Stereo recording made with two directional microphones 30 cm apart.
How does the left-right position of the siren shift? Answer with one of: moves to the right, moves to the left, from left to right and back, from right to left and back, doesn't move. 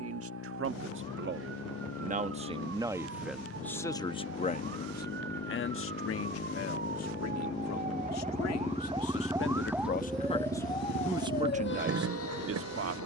moves to the left.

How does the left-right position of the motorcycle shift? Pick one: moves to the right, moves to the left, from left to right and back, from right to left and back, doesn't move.
moves to the right.